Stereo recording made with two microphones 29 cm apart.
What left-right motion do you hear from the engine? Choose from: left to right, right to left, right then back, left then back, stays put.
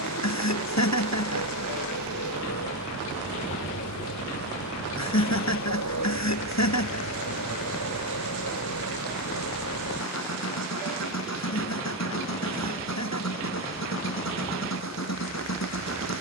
stays put.